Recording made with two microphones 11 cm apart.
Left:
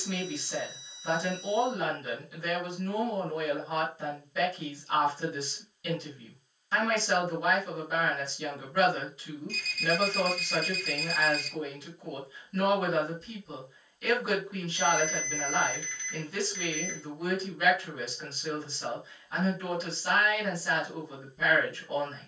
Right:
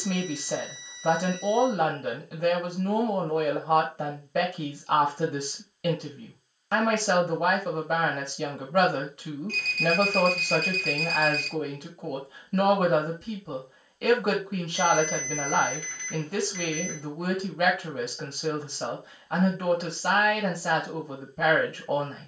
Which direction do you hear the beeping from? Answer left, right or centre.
right.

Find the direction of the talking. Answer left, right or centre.
right.